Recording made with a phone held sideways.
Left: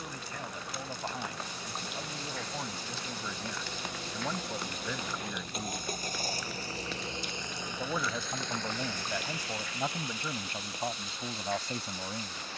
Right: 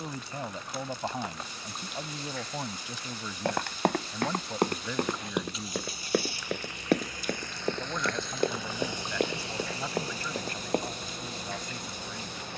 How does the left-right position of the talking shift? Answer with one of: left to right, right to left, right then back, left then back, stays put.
right to left.